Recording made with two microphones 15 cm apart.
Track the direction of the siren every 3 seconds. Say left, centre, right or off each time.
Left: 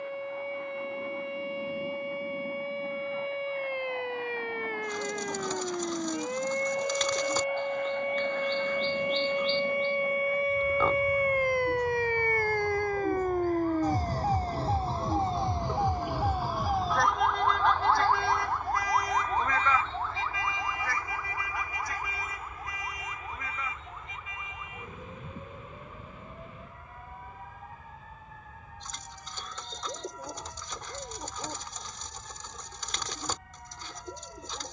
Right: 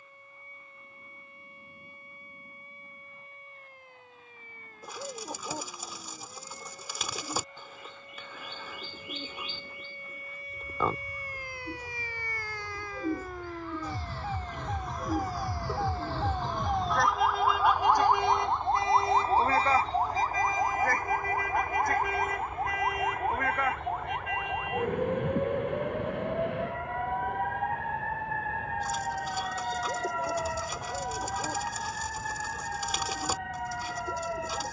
left, left, left, left, left, centre, right, right, right, right, right, right.